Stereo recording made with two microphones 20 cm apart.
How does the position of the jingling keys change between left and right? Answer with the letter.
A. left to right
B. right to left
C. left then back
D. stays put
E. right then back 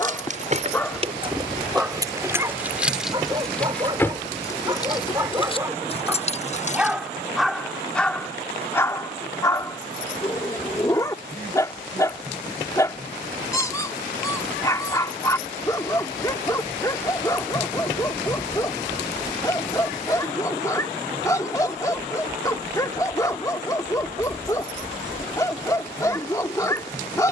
B.